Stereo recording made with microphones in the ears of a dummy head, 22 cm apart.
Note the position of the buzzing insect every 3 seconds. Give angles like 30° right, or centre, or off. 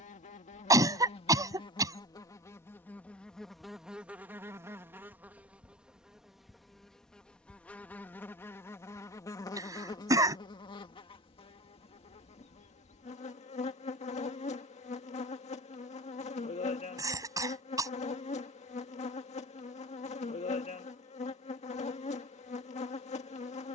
20° left, centre, 10° left, 20° left, 30° left, 30° left, 30° left, 30° left.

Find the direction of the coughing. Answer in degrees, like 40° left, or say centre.
20° right.